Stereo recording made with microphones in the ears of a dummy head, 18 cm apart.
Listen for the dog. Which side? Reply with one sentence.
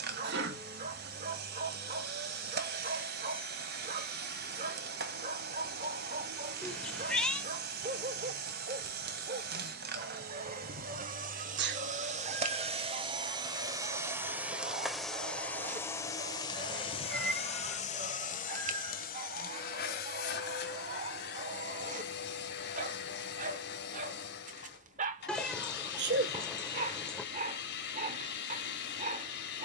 You can hear the dog on the right.